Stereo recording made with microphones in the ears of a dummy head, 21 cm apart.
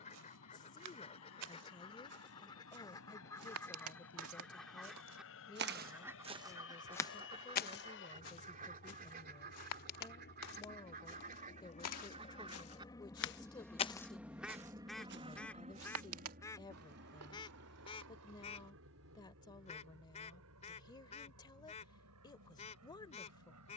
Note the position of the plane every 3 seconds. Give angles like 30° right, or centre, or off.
70° left, 70° left, 60° left, 40° left, 10° left, 40° right, 60° right, 70° right.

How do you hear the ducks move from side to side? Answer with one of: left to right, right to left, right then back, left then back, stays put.
right then back.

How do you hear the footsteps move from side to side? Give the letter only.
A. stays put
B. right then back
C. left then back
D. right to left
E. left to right
C.